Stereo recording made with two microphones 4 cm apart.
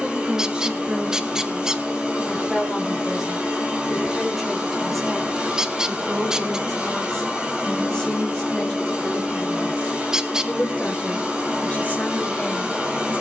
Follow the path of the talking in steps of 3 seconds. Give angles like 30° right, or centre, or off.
20° right, centre, 10° left, 30° left, 40° left.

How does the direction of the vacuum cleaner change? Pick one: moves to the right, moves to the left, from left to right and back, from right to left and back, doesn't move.
doesn't move.